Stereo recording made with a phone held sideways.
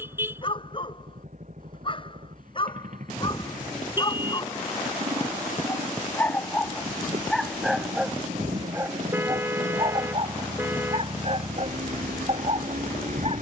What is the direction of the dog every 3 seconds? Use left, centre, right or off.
left, left, centre, right, right.